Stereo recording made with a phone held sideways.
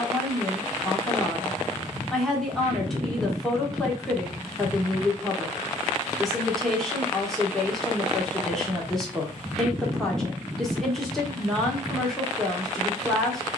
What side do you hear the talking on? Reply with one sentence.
In this clip you hear the talking in the centre.